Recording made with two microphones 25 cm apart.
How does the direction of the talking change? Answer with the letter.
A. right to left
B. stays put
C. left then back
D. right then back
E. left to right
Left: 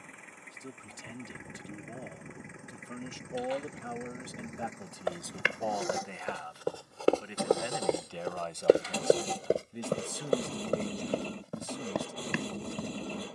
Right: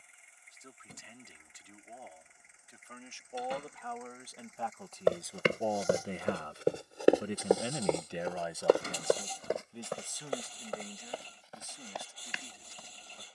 D.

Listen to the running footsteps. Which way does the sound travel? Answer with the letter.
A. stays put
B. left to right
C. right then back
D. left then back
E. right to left
E.